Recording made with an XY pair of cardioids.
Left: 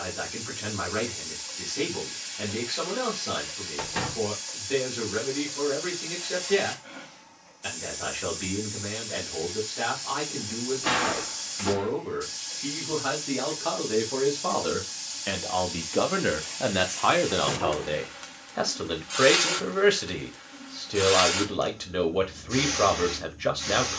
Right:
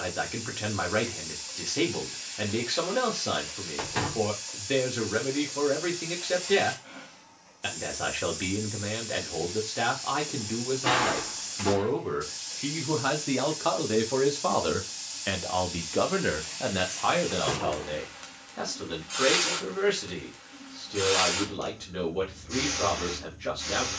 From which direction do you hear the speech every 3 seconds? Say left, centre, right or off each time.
right, right, right, right, right, left, left, left.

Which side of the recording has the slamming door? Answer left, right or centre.
centre.